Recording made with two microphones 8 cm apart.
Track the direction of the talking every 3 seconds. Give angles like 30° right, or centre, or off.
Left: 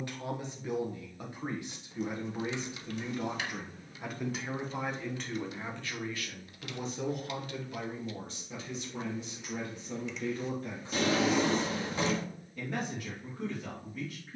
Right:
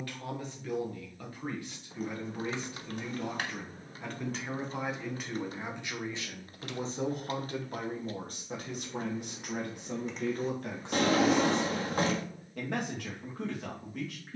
20° left, centre, 40° right, 70° right, 80° right.